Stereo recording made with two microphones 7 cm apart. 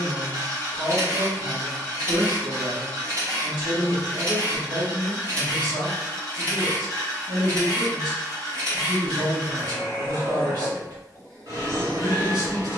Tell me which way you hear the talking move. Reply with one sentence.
In this clip you hear the talking stay put.